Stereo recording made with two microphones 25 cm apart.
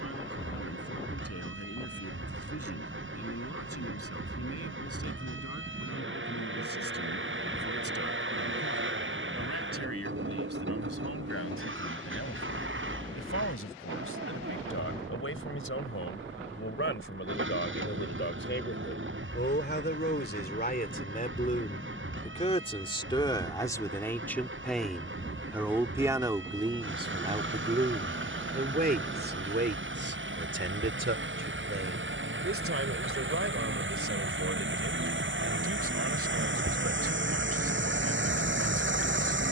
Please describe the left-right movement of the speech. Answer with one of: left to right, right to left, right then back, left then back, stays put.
left to right.